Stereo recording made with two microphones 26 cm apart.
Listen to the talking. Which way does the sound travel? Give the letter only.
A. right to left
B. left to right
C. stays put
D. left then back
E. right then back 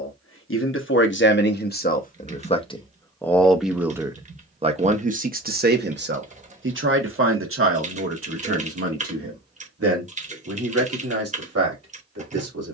B.